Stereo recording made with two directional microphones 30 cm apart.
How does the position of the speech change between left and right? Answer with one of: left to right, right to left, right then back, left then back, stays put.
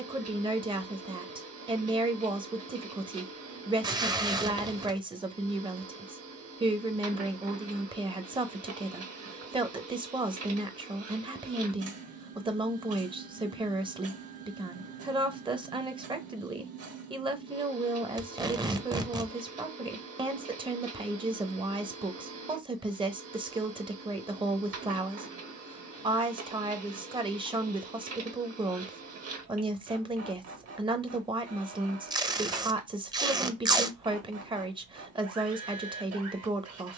stays put.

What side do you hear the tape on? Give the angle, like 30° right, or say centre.
10° right.